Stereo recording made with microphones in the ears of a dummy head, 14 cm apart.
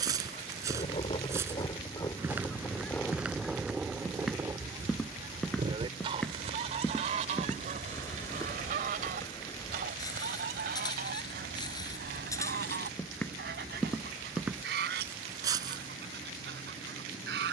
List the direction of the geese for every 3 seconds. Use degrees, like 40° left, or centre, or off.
30° left, 10° right, 50° right, 60° right, 70° right, 70° right.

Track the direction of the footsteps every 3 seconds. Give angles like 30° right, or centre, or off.
20° right, centre, 10° left, 20° left, 10° left, 20° right.